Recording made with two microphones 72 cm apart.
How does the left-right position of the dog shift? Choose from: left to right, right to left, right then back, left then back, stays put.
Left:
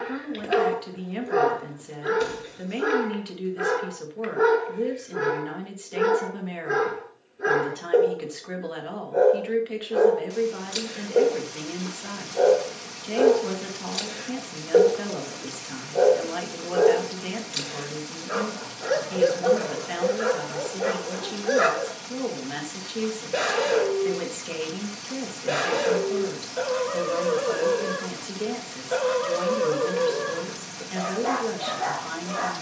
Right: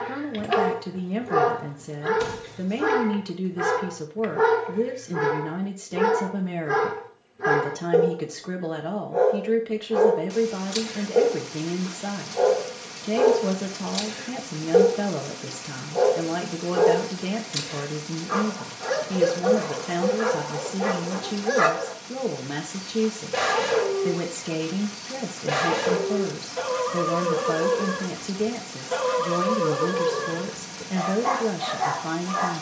stays put.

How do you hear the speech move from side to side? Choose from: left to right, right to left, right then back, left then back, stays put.
stays put.